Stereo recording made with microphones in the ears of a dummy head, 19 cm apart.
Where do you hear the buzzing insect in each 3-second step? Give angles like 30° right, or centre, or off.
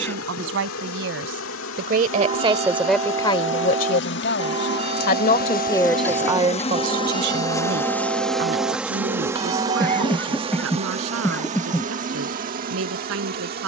70° left, 50° left, 20° left, 30° right, 40° right.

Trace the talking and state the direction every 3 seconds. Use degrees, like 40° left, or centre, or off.
50° right, 40° left, 50° right, 70° right, 70° right.